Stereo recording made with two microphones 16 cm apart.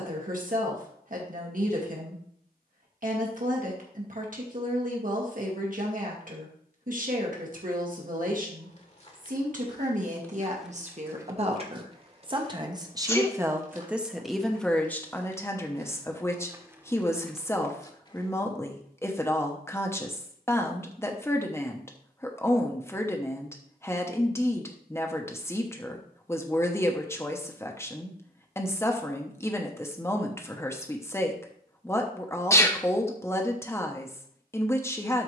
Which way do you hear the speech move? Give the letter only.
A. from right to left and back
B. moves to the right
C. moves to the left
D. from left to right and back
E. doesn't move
C.